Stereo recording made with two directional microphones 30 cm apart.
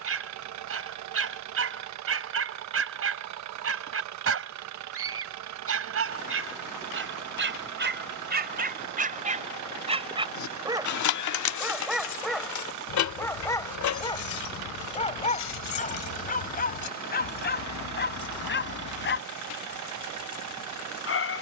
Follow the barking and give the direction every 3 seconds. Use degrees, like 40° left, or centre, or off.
50° right, 50° right, 40° right, 10° right, 10° left, 30° left, 40° left.